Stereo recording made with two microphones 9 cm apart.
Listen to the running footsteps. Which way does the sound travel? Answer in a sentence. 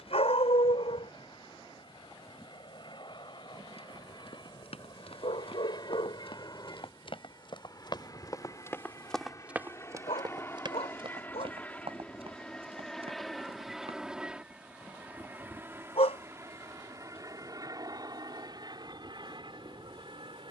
You can hear the running footsteps move to the right.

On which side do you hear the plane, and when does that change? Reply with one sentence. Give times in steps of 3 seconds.
In this clip you hear the plane on the left from 0 s, in the centre from 12 s and on the right from 15 s.